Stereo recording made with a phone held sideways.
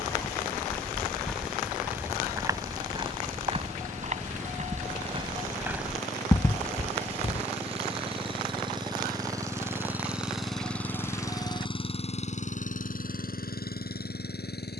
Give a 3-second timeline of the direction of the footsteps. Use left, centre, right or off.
centre, right, left, off, off.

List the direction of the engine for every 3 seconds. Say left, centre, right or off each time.
right, right, right, centre, left.